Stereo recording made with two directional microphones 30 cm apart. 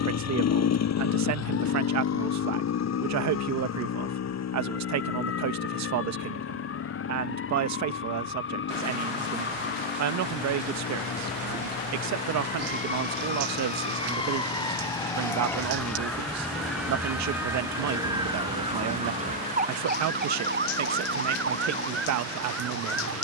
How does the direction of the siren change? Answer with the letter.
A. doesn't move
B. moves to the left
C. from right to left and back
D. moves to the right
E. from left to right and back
D.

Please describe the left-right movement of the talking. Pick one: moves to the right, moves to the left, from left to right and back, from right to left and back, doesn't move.
doesn't move.